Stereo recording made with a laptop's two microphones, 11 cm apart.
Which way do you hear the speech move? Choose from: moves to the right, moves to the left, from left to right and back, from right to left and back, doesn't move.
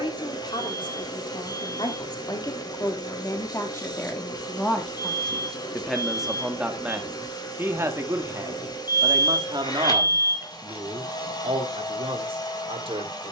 moves to the right.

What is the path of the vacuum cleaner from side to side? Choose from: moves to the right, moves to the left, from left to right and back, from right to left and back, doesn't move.
doesn't move.